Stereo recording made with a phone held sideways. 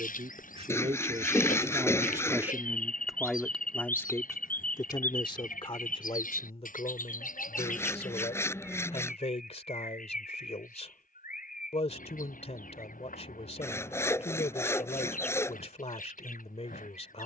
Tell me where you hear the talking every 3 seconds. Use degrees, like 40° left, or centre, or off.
30° right, 20° left, 50° left, 50° left, 50° left, 50° left.